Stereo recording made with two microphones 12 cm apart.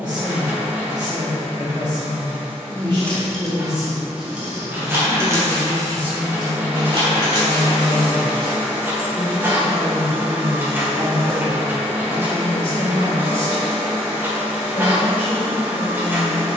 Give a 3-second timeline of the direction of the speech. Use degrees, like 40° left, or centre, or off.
40° right, 30° right, 10° right, 30° left, 40° left, 40° left.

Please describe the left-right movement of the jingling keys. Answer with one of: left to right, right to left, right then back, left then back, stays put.
left to right.